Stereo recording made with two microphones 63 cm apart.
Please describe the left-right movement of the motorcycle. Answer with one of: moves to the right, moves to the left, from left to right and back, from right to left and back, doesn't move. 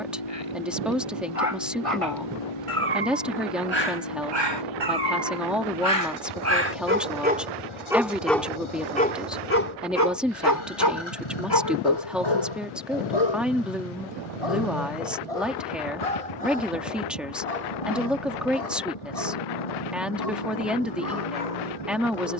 doesn't move.